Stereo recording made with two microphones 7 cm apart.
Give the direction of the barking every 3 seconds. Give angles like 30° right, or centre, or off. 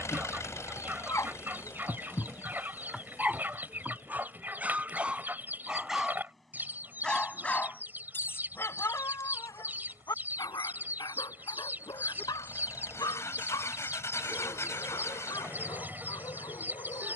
30° left, 10° right, 20° left, 60° left, 70° left, 70° left.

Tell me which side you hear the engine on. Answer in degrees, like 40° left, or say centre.
40° left.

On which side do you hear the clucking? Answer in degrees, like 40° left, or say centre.
30° right.